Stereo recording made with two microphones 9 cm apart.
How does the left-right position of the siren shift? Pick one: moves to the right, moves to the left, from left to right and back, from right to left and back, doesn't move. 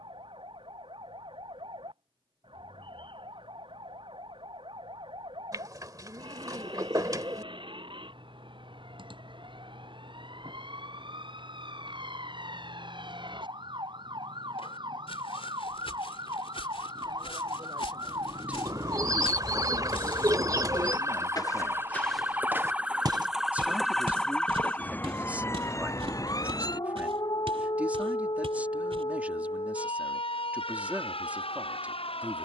moves to the left.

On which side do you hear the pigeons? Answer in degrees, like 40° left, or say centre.
40° right.